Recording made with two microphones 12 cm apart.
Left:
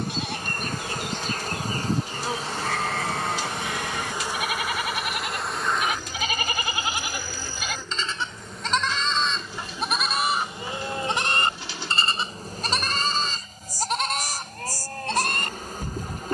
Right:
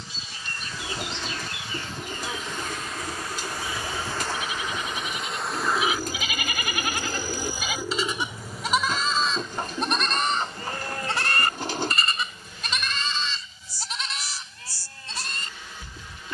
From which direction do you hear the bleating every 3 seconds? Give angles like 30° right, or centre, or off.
70° left, 70° left, 10° left, 10° left, 50° left, 60° left.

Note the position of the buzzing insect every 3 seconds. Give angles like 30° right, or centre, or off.
40° left, 10° left, 10° right, 20° left, 40° left, 40° left.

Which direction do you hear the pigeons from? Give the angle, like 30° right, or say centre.
50° right.